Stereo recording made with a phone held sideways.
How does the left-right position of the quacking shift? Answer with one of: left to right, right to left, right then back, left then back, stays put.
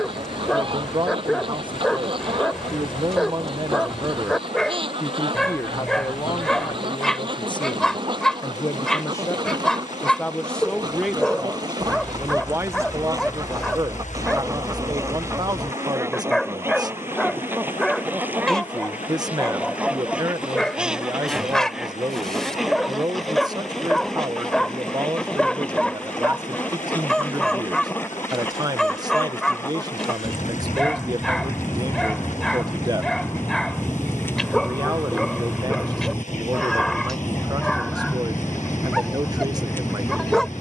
right to left.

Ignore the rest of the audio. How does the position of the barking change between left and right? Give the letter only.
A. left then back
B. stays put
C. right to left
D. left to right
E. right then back
B.